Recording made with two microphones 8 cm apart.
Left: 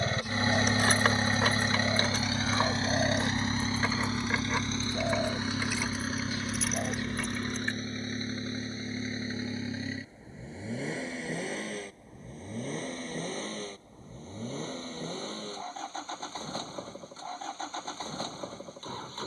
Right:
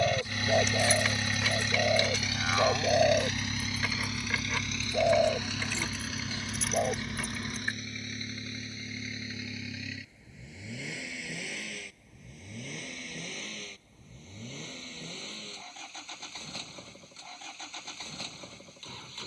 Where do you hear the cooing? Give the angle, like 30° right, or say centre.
20° right.